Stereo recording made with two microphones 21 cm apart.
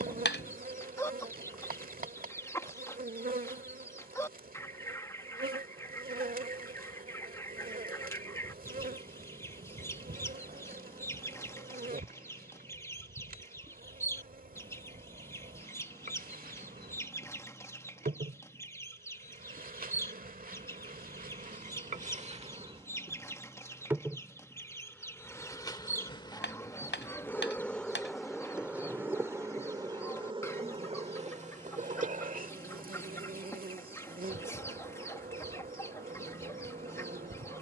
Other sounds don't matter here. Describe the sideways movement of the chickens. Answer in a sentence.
In this clip you hear the chickens stay in one place.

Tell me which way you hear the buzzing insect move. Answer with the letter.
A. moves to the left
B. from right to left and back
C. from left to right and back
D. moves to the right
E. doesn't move
B.